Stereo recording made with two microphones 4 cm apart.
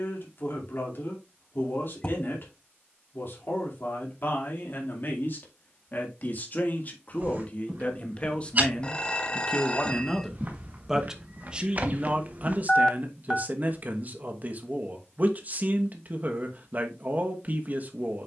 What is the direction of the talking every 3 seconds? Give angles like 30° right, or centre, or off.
50° left, 50° left, 30° left, centre, 40° right, 40° right.